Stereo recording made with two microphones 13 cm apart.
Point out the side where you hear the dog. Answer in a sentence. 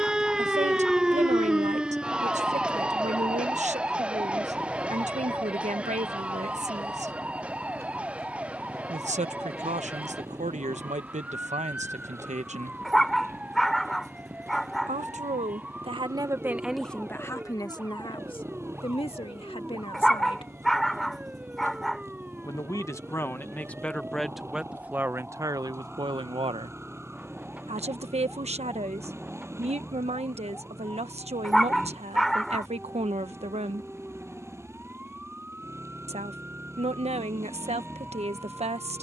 You can hear the dog in the centre.